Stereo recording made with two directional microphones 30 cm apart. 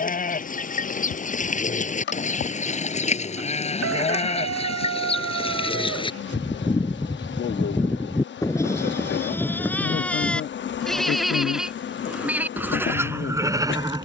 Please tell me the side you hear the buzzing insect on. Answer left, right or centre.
left.